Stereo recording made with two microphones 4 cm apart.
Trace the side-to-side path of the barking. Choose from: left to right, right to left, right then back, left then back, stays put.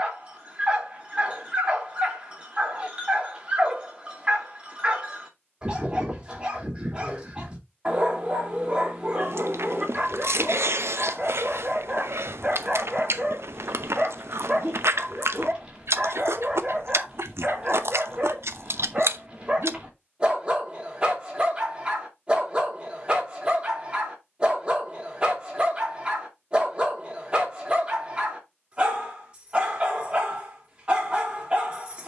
stays put.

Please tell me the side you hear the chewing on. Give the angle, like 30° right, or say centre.
80° right.